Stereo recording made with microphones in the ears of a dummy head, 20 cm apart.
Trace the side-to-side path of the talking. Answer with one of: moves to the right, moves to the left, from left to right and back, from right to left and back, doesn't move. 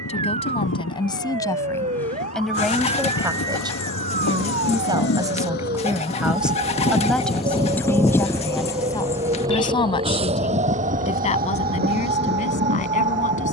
from left to right and back.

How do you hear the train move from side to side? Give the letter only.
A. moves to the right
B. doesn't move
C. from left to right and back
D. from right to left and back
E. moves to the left
A.